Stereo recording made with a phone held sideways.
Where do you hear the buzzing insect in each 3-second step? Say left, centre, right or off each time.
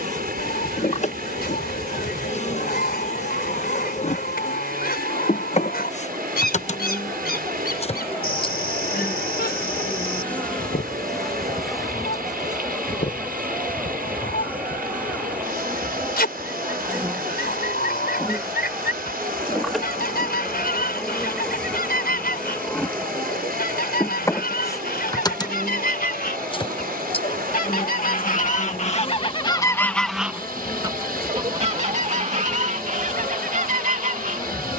left, left, left, centre, centre, centre, centre, centre, left, left, left, left.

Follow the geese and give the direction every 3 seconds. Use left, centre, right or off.
left, left, left, left, left, left, left, left, left, left, right, right.